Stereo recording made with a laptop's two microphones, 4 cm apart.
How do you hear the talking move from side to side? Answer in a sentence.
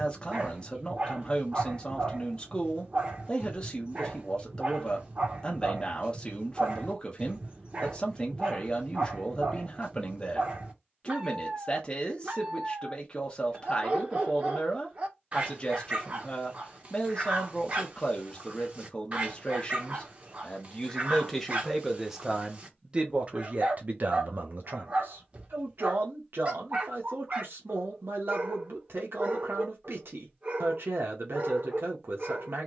In this clip you hear the talking go from the left side to the right.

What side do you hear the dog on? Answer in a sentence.
In this clip you hear the dog on the right.